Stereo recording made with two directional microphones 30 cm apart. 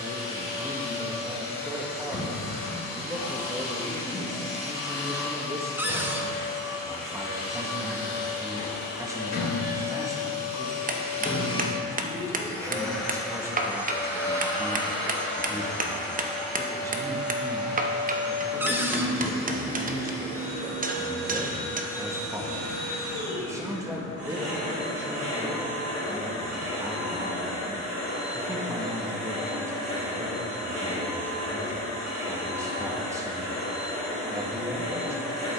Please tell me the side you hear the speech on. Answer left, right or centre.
centre.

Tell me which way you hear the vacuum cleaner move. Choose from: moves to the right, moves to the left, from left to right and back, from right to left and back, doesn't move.
moves to the right.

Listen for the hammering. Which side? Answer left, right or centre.
right.